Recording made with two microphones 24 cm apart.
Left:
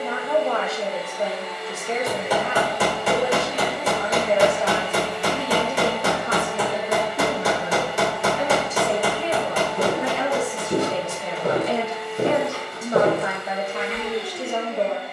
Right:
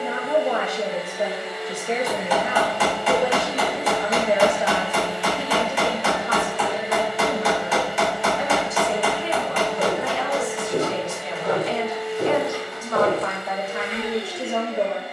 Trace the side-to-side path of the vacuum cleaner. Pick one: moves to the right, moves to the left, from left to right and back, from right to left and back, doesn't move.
doesn't move.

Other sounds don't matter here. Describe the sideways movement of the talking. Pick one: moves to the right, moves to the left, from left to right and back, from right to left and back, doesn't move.
from right to left and back.